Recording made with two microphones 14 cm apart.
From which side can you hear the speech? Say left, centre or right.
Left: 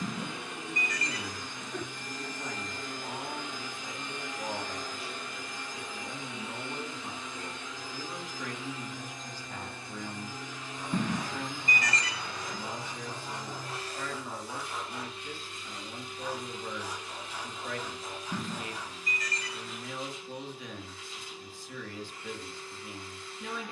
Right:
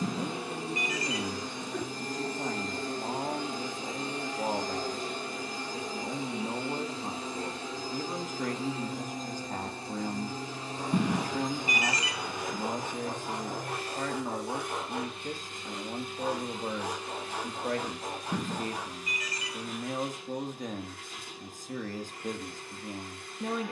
right.